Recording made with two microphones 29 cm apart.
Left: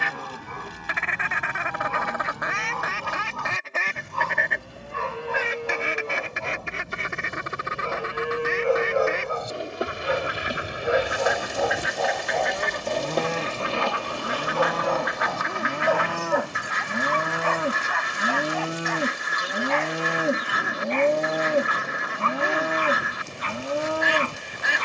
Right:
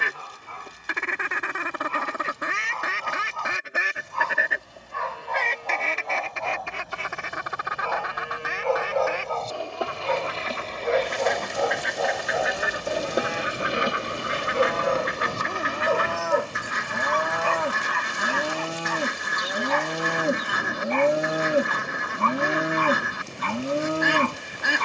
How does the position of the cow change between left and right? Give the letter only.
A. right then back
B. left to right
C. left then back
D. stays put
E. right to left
B.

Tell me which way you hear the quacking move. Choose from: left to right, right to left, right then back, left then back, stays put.
left then back.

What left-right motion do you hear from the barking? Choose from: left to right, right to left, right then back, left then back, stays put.
left to right.